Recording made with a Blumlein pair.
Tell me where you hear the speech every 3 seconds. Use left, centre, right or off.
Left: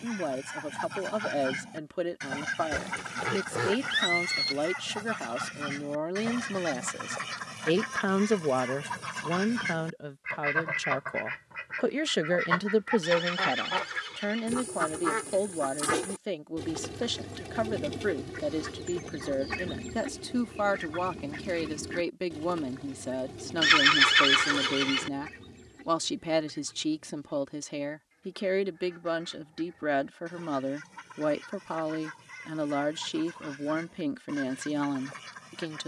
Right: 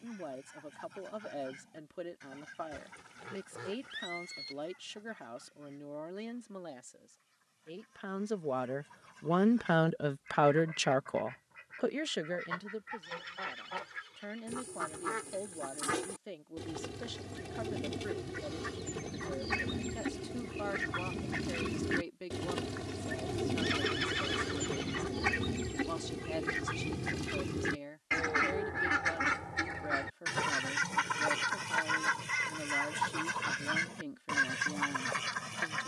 left, left, left, centre, left, left, left, left, left, left, left, left.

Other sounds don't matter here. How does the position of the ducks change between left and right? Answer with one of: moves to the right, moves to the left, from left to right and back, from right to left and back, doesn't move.
moves to the right.